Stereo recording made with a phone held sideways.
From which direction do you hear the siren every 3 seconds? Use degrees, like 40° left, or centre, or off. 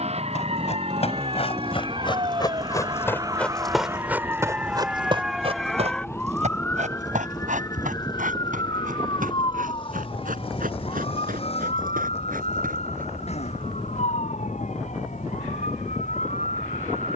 40° right, 10° right, 20° left, 40° left, 50° left, 60° left.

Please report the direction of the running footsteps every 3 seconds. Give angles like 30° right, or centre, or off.
40° left, 20° right, 70° right, 80° right, 80° right, off.